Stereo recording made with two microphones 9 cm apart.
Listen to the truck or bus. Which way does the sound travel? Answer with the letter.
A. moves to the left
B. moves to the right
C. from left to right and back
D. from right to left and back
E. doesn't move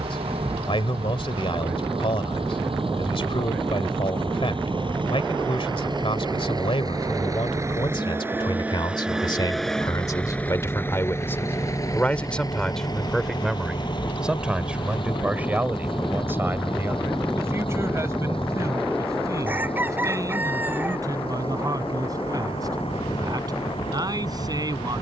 A.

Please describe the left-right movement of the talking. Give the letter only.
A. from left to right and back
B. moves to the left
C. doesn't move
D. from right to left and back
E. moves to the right
E.